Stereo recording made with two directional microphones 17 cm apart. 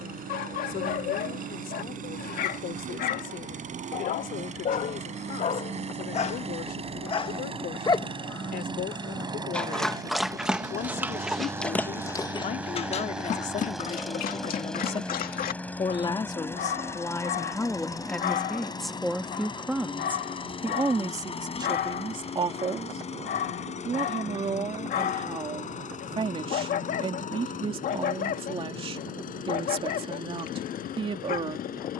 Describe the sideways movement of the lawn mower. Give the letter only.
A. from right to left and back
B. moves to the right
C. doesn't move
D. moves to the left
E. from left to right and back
D.